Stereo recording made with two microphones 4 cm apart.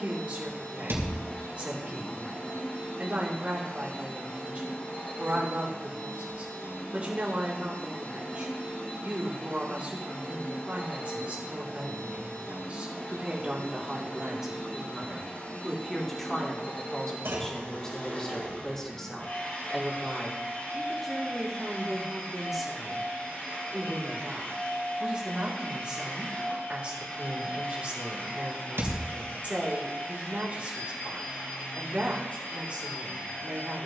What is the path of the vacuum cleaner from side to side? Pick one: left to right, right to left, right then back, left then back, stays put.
stays put.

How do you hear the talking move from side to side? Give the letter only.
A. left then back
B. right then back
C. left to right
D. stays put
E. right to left
A.